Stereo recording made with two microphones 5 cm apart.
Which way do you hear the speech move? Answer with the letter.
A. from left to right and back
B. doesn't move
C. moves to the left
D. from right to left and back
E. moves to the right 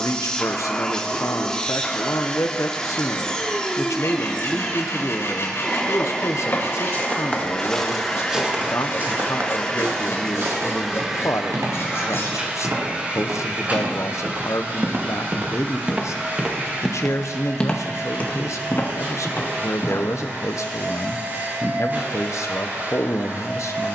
B.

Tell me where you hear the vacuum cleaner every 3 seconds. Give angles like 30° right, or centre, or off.
10° left, 10° left, 10° left, centre, 30° right, 40° right, 40° right, 40° right.